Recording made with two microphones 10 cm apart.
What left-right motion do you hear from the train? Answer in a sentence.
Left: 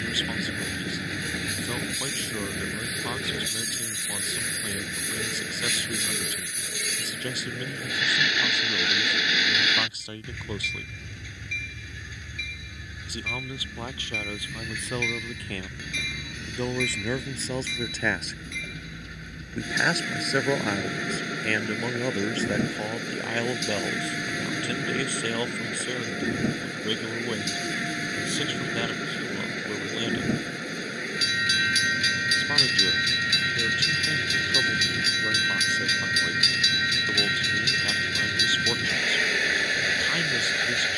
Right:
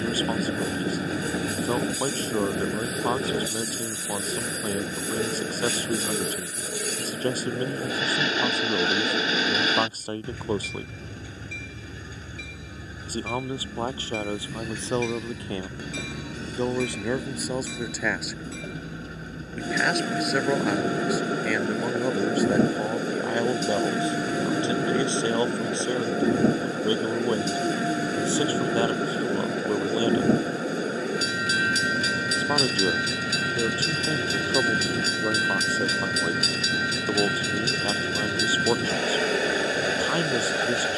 In this clip you hear the train stay in one place.